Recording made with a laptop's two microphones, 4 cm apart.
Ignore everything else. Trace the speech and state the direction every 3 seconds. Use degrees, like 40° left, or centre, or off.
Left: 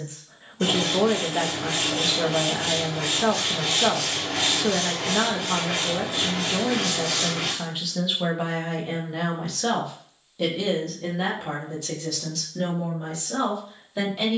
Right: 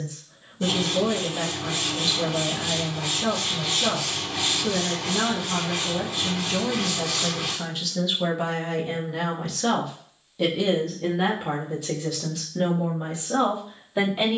40° left, 40° left, 20° left, centre, 10° right.